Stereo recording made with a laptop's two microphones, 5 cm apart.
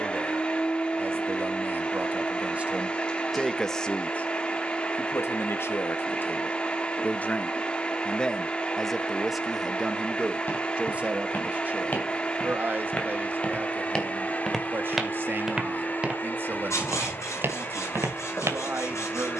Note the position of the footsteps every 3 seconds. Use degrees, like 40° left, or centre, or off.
off, off, off, 40° left, 20° left, 30° right, 50° right.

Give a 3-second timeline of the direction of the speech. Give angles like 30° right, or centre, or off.
40° right, 30° left, 20° left, 20° right, 40° right, 40° right, 40° right.